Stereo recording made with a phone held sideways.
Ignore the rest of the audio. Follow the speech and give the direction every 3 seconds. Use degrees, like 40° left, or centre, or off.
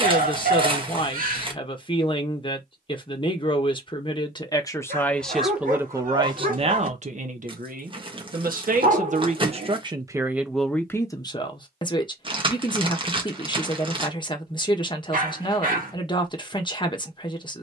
30° left, 20° left, 50° right, 10° right, 30° left, 30° left.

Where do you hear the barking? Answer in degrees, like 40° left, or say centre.
60° right.